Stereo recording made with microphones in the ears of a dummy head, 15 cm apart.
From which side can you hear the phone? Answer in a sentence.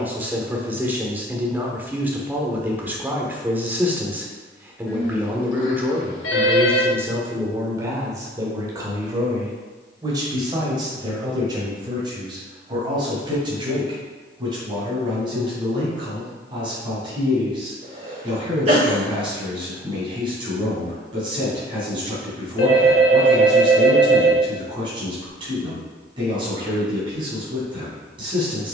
You can hear the phone on the left.